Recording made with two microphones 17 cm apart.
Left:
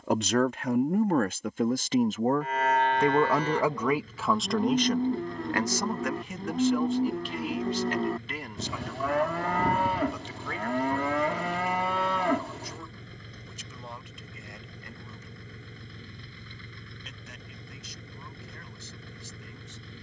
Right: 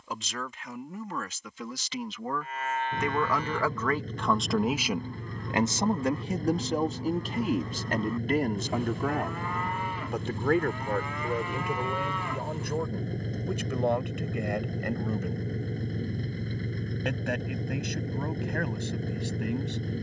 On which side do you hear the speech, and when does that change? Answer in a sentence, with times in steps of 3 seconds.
You can hear the speech on the left from 0 s, in the centre from 3 s and on the right from 6 s.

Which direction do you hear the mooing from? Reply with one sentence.
You can hear the mooing on the left.